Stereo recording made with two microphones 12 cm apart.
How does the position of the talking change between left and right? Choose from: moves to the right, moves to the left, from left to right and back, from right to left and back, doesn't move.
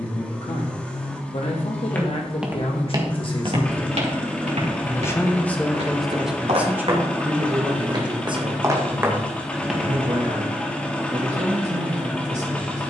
moves to the right.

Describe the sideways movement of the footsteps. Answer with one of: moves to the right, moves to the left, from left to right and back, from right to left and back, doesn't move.
from left to right and back.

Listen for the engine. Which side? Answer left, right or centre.
centre.